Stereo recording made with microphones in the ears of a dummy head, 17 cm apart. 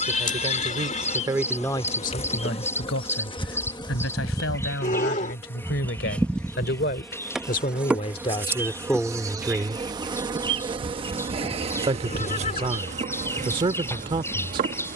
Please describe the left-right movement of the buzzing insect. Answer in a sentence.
In this clip you hear the buzzing insect travel towards the right.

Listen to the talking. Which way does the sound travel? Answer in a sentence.
You can hear the talking move from right to left and back again.